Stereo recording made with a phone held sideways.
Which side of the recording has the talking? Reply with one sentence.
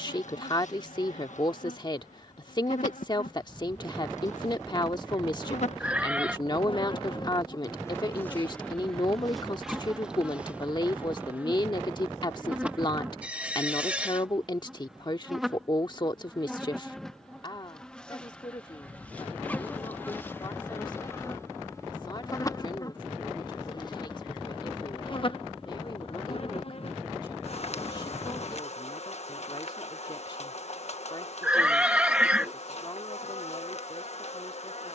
You can hear the talking on the left.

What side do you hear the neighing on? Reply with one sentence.
You can hear the neighing in the centre.